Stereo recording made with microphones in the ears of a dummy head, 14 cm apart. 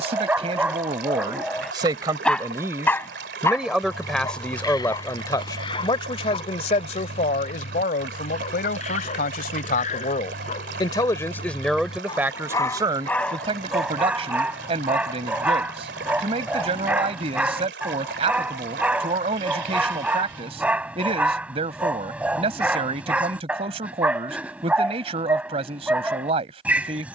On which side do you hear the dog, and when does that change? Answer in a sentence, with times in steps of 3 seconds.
In this clip you hear the dog in the centre from 0 s, on the left from 3 s and in the centre from 12 s.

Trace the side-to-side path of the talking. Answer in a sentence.
You can hear the talking move from right to left and back again.